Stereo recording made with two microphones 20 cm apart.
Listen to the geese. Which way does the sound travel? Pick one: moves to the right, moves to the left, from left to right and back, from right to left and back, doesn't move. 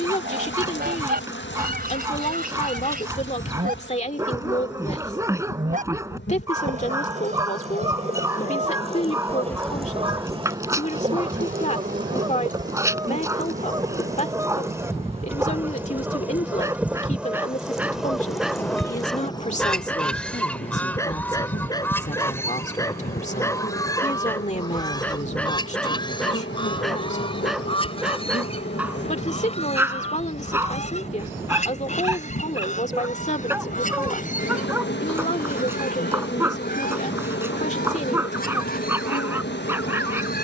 moves to the left.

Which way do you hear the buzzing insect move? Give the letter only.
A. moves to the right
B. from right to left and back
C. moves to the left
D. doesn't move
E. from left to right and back
E.